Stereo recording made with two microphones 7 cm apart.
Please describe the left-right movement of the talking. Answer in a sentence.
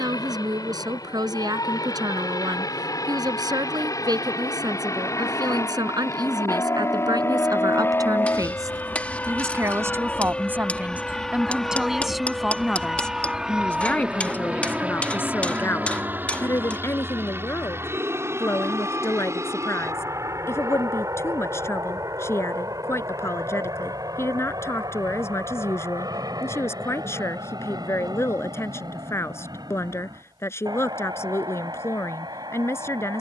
In this clip you hear the talking travel towards the left.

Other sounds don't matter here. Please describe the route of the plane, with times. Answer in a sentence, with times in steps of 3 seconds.
You can hear the plane on the left from 0 s, in the centre from 9 s and on the right from 15 s.